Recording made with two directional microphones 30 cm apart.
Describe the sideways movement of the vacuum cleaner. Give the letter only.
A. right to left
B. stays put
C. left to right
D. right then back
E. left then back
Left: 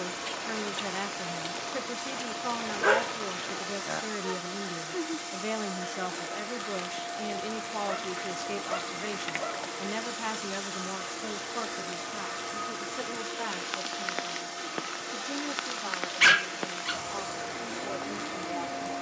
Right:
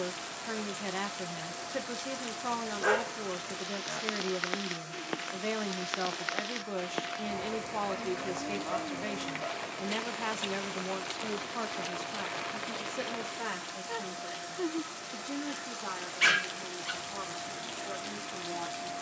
B.